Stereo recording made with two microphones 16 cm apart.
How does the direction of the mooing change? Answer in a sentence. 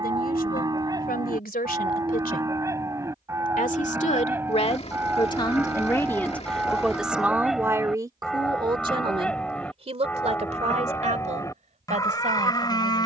You can hear the mooing go from the right side to the left.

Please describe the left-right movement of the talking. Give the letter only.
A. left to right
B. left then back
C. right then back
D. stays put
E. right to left
A.